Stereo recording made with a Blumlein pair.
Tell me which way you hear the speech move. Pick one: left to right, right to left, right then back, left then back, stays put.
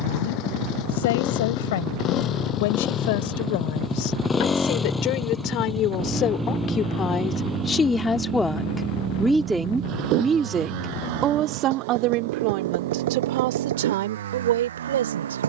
left to right.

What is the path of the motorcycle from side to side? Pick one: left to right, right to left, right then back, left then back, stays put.
left to right.